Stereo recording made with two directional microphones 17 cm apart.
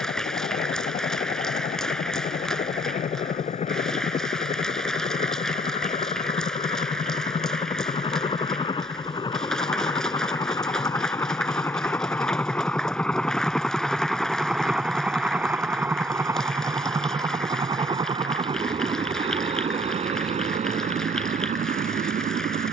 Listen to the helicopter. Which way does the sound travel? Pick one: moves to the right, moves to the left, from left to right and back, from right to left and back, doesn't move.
moves to the right.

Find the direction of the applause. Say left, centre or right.
centre.